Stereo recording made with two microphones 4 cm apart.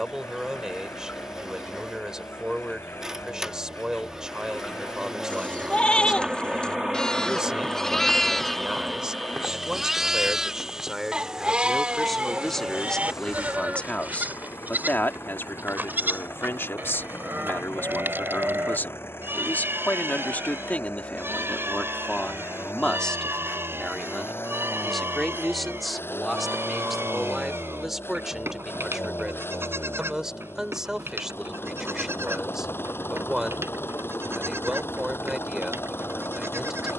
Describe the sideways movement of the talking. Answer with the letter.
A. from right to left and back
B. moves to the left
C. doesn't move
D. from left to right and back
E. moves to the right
A.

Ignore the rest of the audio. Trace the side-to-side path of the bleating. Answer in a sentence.
In this clip you hear the bleating move to the right.